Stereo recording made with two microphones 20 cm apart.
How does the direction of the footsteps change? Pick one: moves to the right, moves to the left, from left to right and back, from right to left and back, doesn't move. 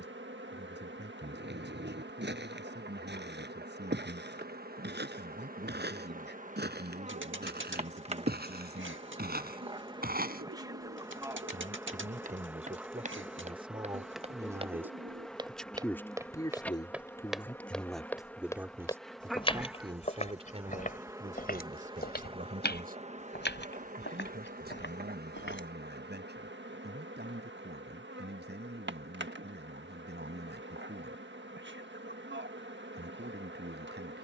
moves to the left.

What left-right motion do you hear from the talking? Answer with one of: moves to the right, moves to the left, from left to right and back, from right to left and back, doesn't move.
from right to left and back.